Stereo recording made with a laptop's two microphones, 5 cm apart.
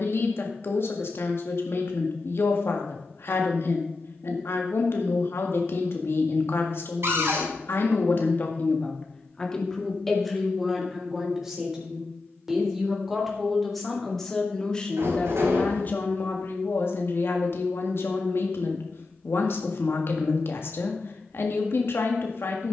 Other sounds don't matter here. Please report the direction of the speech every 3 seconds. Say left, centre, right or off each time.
left, left, left, centre, centre, left, left, left.